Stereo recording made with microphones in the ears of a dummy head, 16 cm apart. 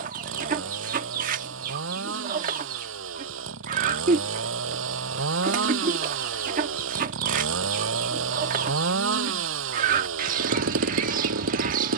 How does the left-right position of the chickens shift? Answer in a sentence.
In this clip you hear the chickens stay put.